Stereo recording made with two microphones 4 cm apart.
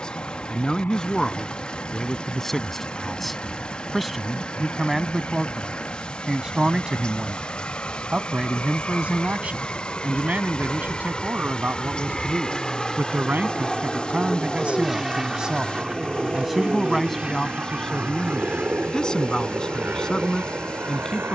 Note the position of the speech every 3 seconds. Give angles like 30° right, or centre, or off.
10° left, centre, 20° right, 40° right, 40° right, centre, 20° left.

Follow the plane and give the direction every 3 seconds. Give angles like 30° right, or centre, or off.
60° left, 50° left, 40° left, 30° left, 10° left, 20° right, 40° right.